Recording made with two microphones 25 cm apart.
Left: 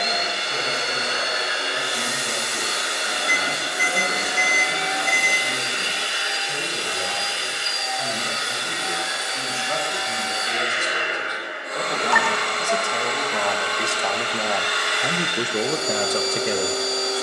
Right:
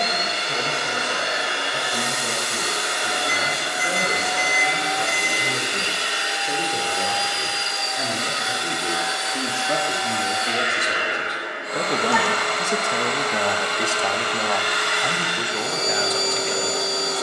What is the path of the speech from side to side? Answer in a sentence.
In this clip you hear the speech travel towards the left.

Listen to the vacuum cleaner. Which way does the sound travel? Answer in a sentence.
You can hear the vacuum cleaner stay put.